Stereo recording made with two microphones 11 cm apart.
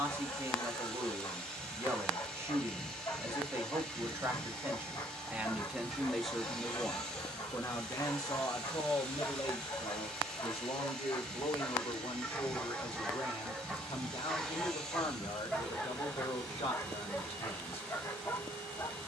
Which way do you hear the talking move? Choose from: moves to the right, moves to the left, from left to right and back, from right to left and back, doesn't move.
moves to the left.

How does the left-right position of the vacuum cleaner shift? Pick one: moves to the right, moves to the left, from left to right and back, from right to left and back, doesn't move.
doesn't move.